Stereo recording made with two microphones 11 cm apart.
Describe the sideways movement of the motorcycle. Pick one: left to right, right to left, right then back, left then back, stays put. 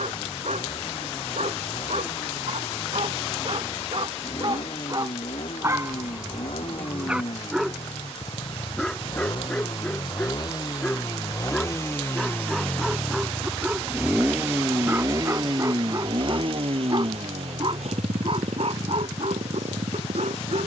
left to right.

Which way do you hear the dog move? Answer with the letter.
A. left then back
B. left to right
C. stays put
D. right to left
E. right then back
A.